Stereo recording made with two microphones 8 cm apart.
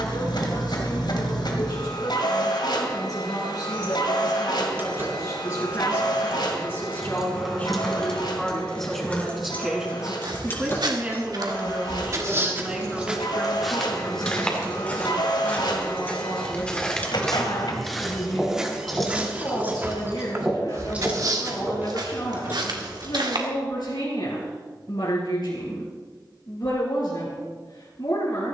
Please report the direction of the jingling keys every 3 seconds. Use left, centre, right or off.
off, right, centre, left, left, left, centre, right, off, off.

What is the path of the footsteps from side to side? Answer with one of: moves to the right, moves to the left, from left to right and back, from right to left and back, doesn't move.
from right to left and back.